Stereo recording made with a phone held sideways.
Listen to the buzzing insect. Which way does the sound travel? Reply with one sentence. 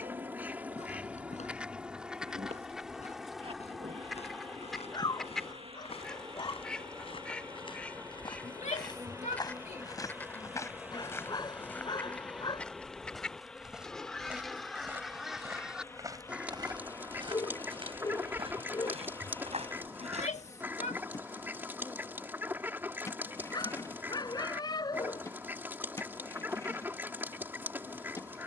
You can hear the buzzing insect move from right to left.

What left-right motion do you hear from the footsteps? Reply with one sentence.
You can hear the footsteps move to the right.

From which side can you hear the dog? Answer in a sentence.
In this clip you hear the dog on the left.